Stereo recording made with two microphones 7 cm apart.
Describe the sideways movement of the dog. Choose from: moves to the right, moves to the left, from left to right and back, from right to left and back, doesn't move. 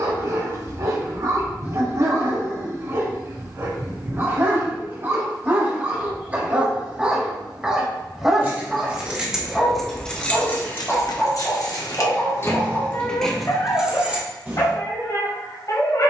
moves to the left.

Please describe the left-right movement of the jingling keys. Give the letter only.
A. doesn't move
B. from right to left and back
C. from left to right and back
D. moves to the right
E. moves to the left
B.